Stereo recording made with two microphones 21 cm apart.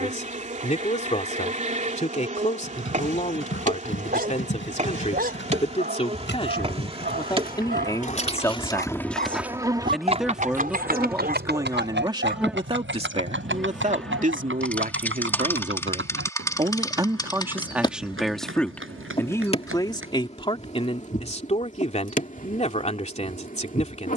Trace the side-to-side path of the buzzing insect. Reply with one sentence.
You can hear the buzzing insect go from the right side to the left.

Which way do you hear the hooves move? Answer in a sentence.
In this clip you hear the hooves move to the right.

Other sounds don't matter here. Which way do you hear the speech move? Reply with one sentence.
In this clip you hear the speech go right and come back.